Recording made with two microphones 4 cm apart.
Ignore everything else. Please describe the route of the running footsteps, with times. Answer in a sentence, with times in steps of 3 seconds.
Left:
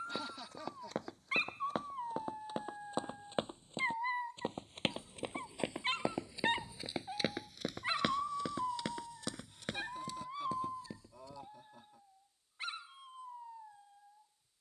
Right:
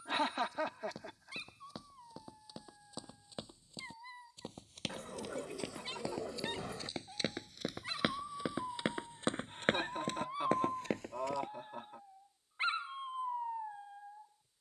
In this clip you hear the running footsteps on the left from 0 s, in the centre from 6 s, on the right from 9 s and not at all from 12 s.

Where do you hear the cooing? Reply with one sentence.
In this clip you hear the cooing on the right.